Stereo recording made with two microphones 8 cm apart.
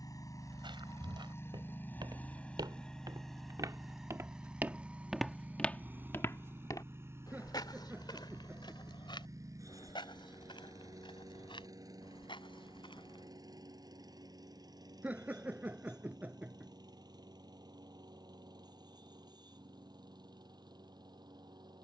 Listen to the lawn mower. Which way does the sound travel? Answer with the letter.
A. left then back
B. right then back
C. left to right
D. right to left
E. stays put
C.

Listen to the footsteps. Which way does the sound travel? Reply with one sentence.
In this clip you hear the footsteps move from right to left.